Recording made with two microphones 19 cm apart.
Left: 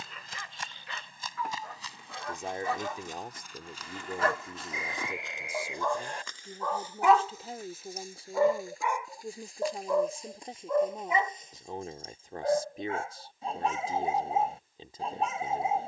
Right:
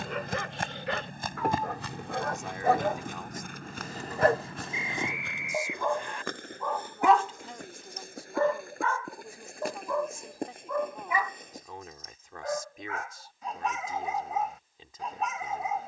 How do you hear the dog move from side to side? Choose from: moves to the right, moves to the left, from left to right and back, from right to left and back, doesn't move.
moves to the left.